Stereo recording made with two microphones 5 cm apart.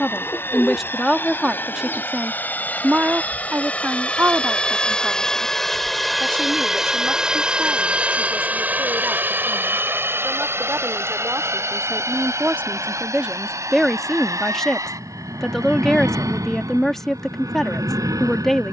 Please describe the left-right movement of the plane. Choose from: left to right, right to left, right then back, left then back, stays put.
left to right.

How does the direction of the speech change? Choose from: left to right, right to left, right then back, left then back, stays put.
right then back.